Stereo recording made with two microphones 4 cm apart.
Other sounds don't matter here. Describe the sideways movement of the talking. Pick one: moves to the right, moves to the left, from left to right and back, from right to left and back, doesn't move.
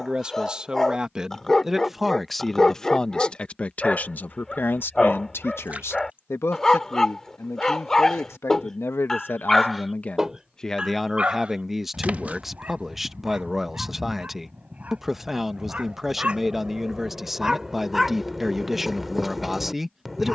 from right to left and back.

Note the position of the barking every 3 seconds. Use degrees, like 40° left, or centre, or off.
10° left, 10° left, 10° left, 10° right, 30° right, 20° right, centre.